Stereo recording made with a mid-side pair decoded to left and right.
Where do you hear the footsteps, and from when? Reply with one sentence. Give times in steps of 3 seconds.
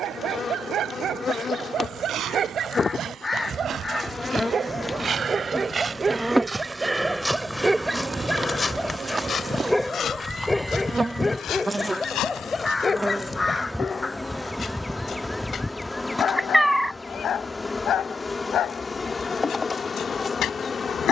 In this clip you hear the footsteps on the right from 0 s, in the centre from 6 s, on the left from 9 s and not at all from 15 s.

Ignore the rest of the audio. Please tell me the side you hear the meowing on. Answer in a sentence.
You can hear the meowing in the centre.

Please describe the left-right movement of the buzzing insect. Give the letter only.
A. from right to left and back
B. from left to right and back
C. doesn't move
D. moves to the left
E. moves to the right
B.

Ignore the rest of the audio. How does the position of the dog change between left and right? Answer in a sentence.
In this clip you hear the dog travel towards the left.